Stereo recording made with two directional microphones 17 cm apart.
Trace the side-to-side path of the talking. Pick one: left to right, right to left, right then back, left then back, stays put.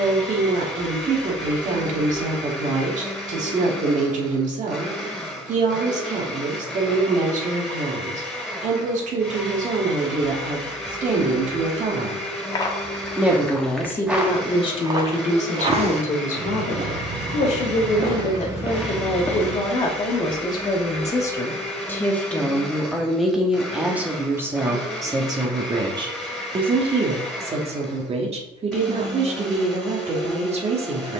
left then back.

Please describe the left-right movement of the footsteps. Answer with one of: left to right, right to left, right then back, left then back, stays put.
right then back.